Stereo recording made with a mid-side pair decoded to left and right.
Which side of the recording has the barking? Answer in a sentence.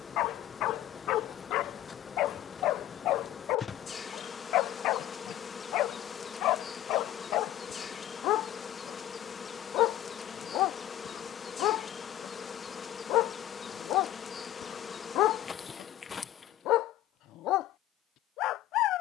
You can hear the barking on the left.